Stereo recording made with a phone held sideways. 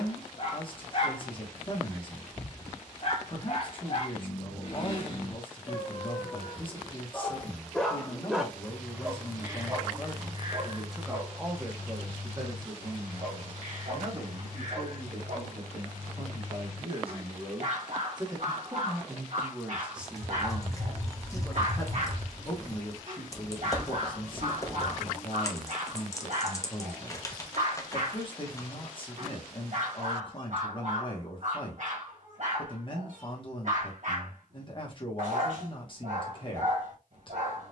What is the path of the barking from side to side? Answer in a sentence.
In this clip you hear the barking go from the left side to the right.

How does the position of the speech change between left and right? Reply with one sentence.
In this clip you hear the speech go right and come back.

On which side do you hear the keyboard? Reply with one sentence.
In this clip you hear the keyboard on the left.